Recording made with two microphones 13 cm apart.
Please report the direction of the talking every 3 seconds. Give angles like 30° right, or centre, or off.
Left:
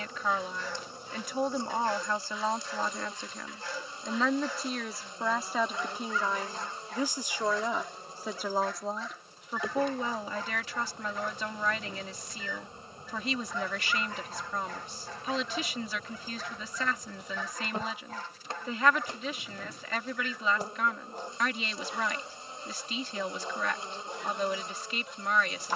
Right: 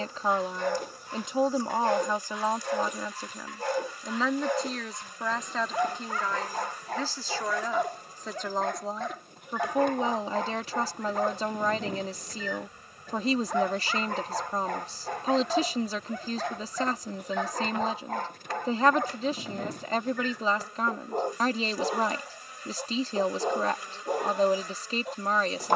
20° right, centre, 10° left, 30° right, 40° right, 40° right, 40° right, 40° right, 40° right.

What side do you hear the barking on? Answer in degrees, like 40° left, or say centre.
60° right.